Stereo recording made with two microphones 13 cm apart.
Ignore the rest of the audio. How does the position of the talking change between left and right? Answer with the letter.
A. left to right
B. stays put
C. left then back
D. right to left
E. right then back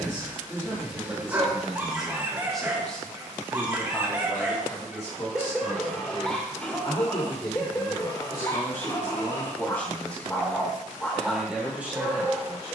C.